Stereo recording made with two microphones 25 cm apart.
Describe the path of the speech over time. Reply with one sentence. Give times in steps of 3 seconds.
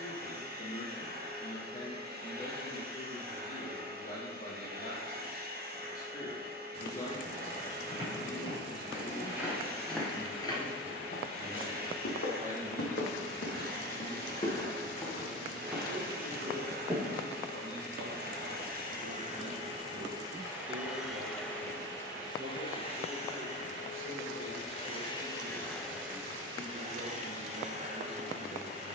You can hear the speech on the left from 0 s, in the centre from 9 s and on the right from 12 s.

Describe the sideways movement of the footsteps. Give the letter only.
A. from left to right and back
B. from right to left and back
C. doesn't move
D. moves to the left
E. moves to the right
B.